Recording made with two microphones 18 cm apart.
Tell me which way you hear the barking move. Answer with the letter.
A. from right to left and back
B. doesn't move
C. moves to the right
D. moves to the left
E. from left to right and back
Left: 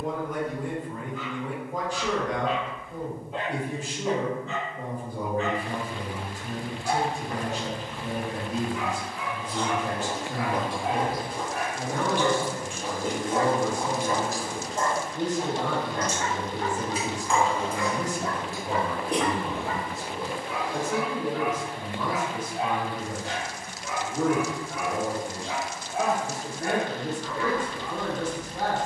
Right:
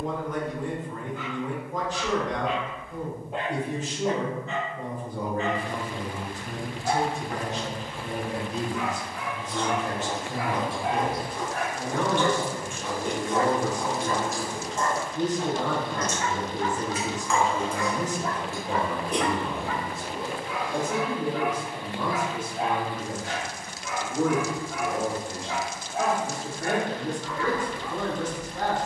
D.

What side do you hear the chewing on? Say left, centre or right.
left.